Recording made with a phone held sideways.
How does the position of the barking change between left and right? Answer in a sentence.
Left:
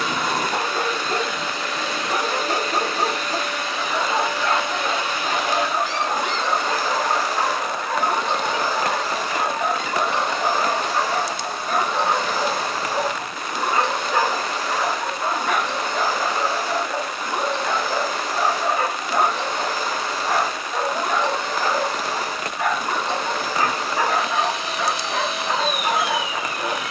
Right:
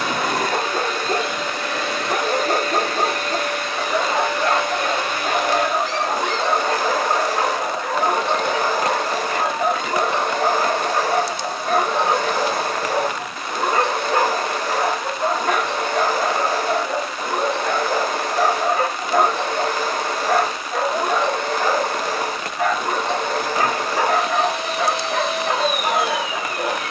You can hear the barking stay in one place.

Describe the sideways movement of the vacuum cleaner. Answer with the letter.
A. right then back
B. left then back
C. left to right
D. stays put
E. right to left
D.